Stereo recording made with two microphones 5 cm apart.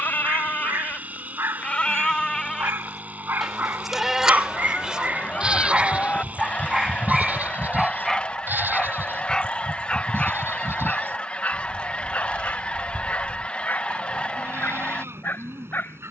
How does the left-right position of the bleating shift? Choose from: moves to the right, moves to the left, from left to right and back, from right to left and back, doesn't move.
moves to the right.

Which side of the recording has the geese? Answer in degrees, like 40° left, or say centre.
30° left.